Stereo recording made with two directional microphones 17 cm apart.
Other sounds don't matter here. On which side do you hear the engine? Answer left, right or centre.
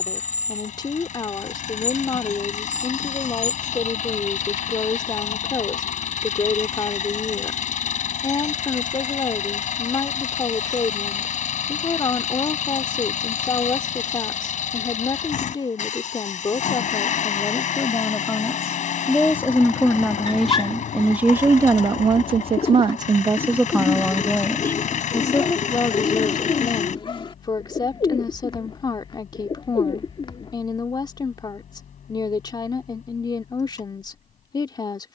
left.